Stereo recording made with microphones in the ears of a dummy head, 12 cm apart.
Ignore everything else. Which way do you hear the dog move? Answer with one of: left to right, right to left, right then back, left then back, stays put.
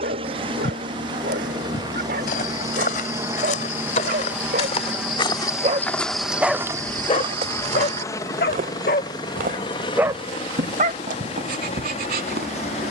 left then back.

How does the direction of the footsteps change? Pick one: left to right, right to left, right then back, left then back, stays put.
left to right.